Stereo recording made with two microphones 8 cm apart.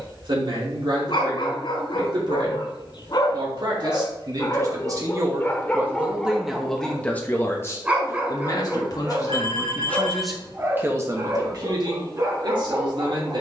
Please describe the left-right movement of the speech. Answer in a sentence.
You can hear the speech go left and come back.